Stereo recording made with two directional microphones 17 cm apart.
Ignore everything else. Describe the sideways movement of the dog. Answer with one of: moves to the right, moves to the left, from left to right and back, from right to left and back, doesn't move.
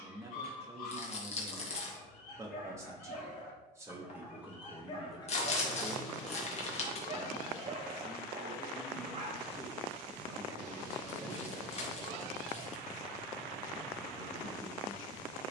from left to right and back.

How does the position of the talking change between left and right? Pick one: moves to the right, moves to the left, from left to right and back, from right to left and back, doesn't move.
moves to the left.